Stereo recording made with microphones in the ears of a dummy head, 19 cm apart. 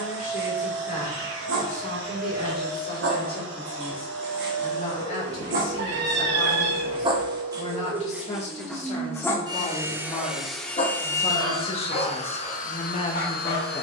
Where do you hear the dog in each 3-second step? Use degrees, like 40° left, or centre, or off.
70° right, 50° right, 10° right, 30° left, 50° left.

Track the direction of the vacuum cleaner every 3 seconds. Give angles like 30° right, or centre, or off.
70° right, 60° right, 40° right, centre, 40° left.